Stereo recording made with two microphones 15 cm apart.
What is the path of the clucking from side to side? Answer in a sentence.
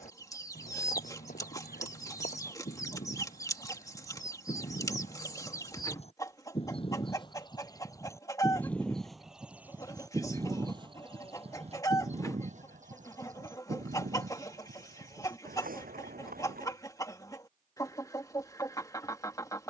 You can hear the clucking stay in one place.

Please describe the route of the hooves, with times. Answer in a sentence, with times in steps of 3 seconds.
You can hear the hooves on the left from 0 s, on the right from 9 s and not at all from 18 s.